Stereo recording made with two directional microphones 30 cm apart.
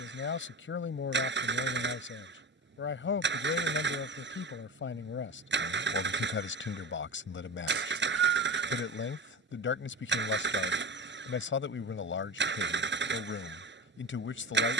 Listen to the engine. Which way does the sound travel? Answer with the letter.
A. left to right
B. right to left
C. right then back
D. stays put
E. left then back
D.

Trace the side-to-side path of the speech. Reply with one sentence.
In this clip you hear the speech stay in one place.